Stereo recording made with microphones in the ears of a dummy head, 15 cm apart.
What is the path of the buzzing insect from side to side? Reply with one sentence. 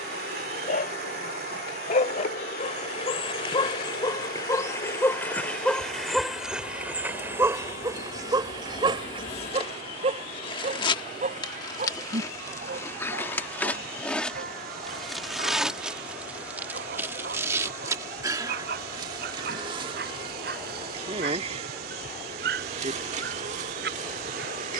In this clip you hear the buzzing insect move from left to right.